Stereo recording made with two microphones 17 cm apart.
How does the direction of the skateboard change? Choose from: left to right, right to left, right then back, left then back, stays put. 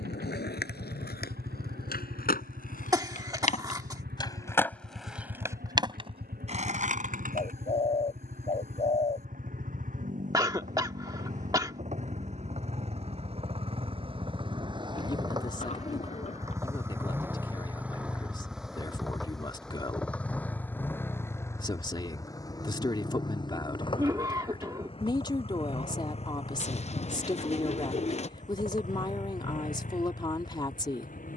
left to right.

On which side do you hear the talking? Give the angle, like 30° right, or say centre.
30° left.